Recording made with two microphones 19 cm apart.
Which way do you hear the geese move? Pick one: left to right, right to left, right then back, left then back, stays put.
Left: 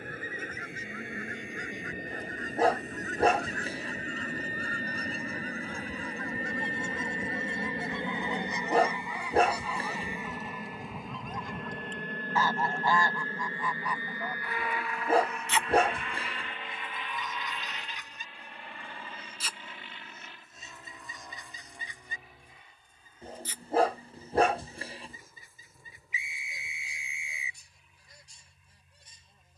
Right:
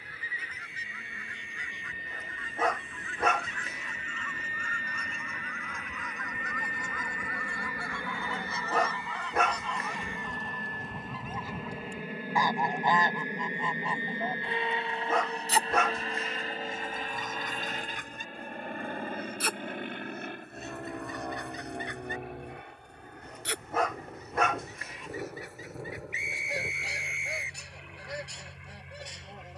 left to right.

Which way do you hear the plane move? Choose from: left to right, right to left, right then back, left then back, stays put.
left to right.